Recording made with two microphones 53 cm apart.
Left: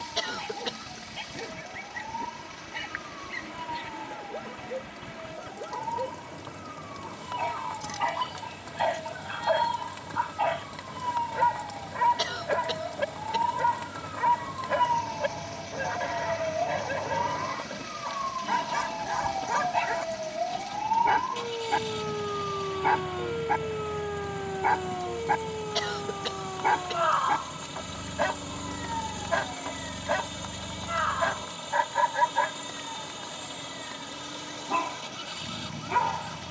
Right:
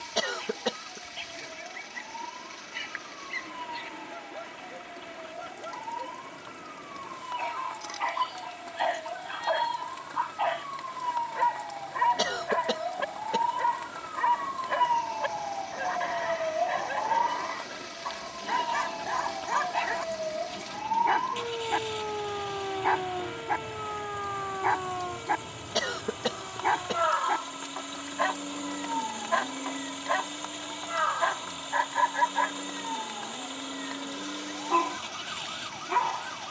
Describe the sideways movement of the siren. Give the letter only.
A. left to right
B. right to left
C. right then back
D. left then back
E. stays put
A.